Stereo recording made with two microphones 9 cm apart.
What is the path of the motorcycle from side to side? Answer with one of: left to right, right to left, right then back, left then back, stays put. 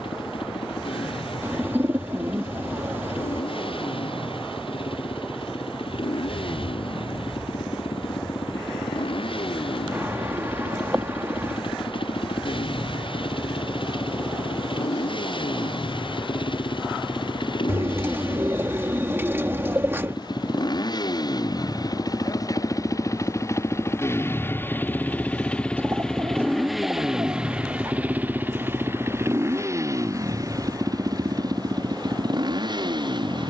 left to right.